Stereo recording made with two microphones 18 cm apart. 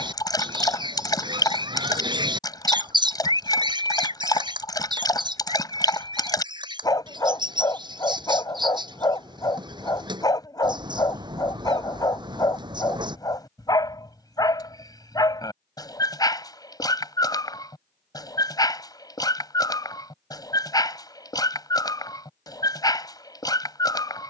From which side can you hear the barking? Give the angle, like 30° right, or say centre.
20° left.